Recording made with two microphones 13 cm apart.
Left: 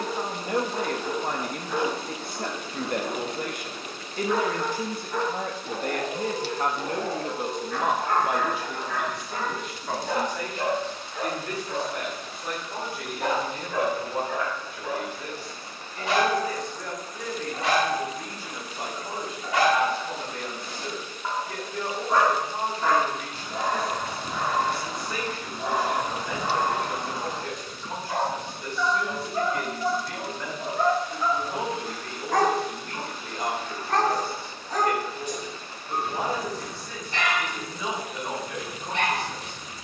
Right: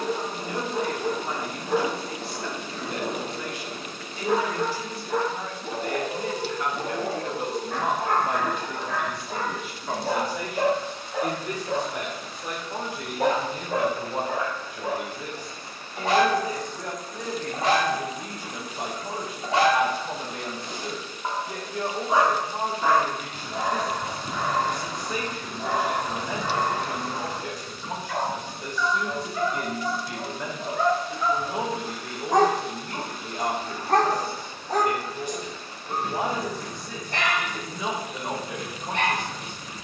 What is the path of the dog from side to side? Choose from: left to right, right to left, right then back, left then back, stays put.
left then back.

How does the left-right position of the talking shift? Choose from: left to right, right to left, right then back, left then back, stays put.
left to right.